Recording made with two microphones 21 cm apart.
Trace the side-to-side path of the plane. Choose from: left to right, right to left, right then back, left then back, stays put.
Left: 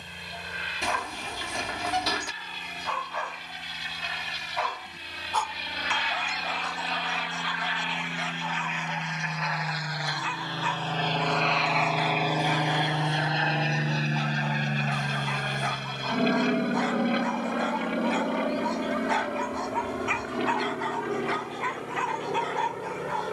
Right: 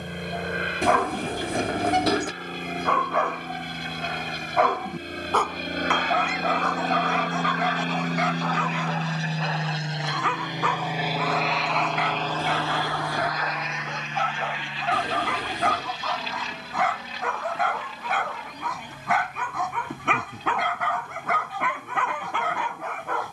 right to left.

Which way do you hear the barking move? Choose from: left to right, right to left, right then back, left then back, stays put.
stays put.